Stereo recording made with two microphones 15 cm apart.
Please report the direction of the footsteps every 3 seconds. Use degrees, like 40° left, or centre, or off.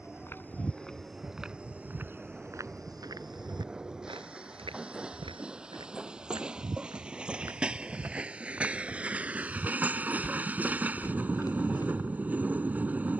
10° right, 40° right, 20° right, 10° left, off.